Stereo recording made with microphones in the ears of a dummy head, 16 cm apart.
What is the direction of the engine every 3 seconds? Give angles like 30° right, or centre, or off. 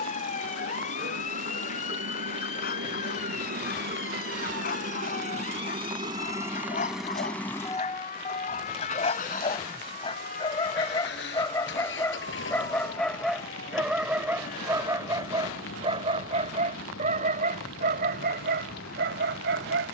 70° right, 50° right, centre, 60° left, 70° left, 80° left, 80° left.